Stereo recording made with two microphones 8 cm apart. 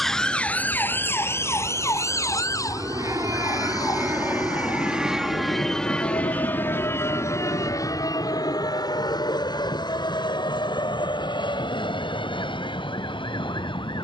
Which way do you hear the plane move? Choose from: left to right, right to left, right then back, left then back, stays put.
right to left.